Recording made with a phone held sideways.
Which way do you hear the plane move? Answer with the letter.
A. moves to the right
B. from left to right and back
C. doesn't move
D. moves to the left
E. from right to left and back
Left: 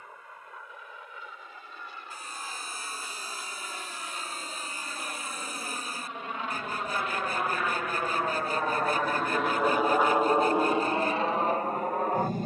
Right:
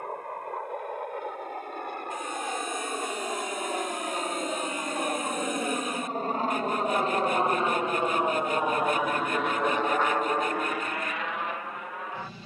D.